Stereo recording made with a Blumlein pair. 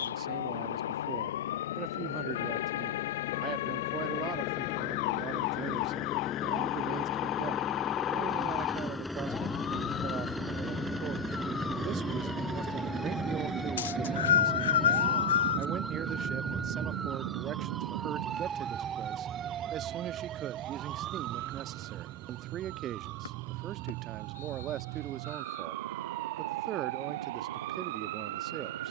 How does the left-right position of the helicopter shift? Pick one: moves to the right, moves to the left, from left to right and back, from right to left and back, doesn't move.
moves to the right.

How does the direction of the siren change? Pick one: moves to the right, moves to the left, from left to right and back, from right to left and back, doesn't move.
moves to the right.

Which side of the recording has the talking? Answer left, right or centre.
right.